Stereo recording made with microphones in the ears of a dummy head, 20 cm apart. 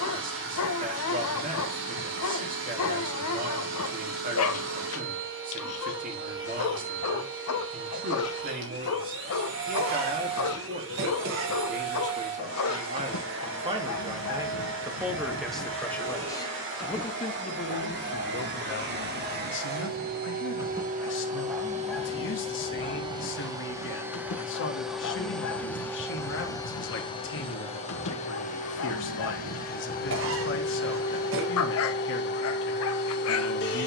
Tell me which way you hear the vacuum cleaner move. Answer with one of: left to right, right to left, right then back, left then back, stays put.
right to left.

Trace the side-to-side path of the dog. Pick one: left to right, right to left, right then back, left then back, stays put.
right then back.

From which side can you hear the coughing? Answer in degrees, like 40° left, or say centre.
60° right.